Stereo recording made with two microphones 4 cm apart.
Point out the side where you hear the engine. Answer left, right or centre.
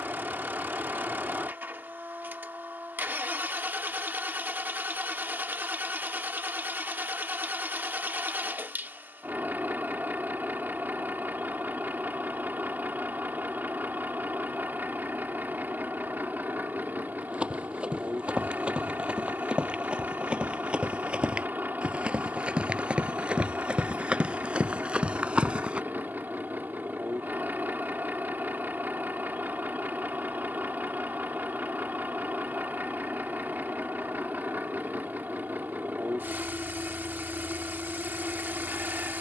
right.